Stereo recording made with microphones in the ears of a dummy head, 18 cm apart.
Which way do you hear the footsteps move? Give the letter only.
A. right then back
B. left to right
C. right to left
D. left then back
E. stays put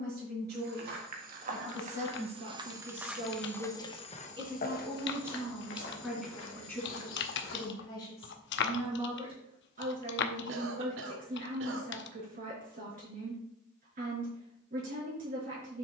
C.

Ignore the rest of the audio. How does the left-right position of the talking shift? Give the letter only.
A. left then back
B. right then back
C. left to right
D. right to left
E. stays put
A.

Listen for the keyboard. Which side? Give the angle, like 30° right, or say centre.
60° left.